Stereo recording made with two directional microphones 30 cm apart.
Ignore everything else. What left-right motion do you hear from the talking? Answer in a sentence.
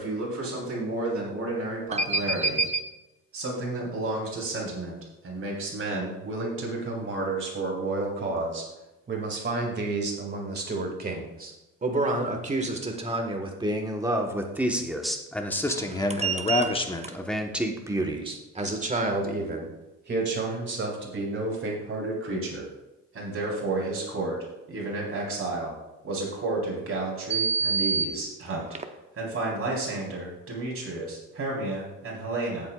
In this clip you hear the talking go left and come back.